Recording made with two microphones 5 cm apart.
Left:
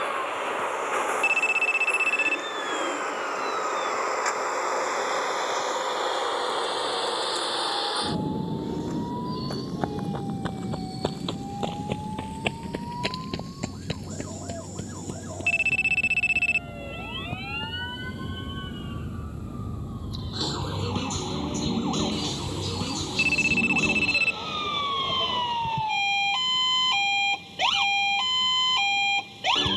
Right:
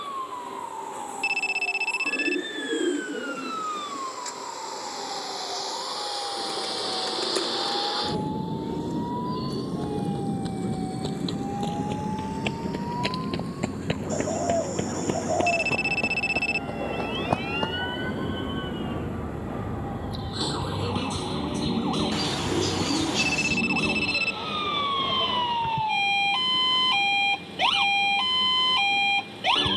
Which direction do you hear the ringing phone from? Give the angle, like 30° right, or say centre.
20° left.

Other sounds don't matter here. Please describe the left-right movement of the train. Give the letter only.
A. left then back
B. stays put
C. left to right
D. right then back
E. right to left
C.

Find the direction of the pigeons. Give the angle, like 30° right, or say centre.
60° right.